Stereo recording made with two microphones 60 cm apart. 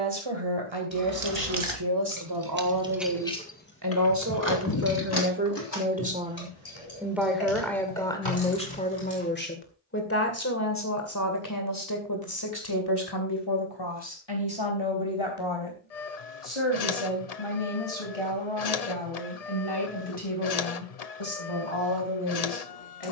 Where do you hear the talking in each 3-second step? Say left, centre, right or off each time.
right, right, centre, left, left, left, left, left.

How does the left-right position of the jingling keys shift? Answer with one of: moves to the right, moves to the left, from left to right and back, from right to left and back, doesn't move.
moves to the left.